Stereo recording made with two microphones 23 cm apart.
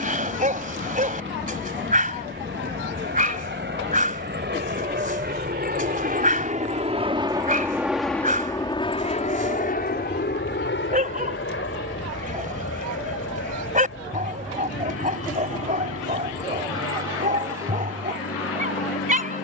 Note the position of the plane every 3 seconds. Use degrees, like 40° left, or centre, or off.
80° right, 60° right, 10° right, 50° left, 70° left, 70° left, 80° left.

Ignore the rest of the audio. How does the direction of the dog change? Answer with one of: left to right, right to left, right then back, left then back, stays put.
stays put.